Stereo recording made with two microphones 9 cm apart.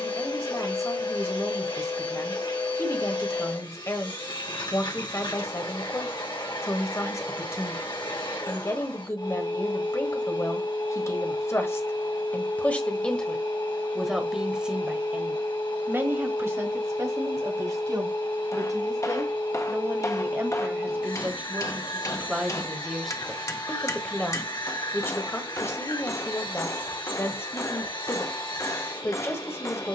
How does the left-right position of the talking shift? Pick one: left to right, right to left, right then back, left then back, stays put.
right then back.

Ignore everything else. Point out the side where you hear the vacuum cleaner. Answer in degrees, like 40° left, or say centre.
60° left.